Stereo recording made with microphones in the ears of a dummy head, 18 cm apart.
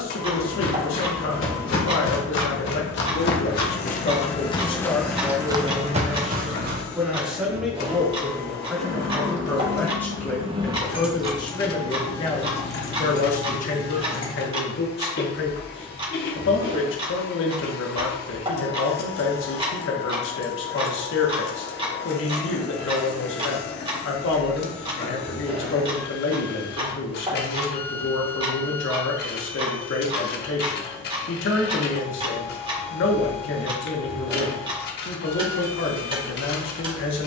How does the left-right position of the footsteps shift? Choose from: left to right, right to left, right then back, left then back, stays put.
left to right.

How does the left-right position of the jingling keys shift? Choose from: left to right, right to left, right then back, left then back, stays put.
right to left.